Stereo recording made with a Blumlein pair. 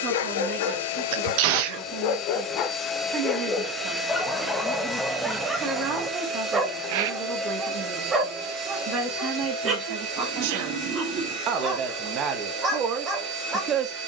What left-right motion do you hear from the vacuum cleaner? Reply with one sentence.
In this clip you hear the vacuum cleaner move to the right.